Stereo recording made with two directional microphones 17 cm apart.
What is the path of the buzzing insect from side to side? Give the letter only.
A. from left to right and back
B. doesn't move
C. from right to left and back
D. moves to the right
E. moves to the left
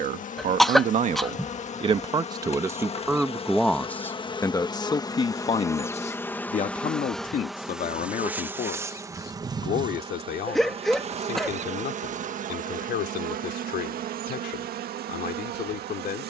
D.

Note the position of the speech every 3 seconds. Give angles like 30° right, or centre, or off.
30° right, 20° left, 50° left, 60° left, 60° left, 60° left.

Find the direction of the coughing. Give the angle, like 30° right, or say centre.
centre.